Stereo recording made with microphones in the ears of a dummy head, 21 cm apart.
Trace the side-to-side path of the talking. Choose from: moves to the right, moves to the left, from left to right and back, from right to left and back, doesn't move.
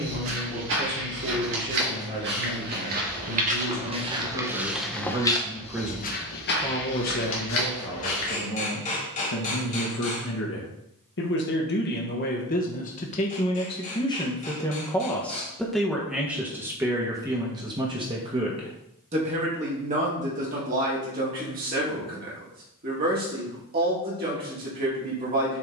from right to left and back.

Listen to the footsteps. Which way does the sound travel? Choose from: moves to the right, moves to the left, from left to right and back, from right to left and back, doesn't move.
moves to the left.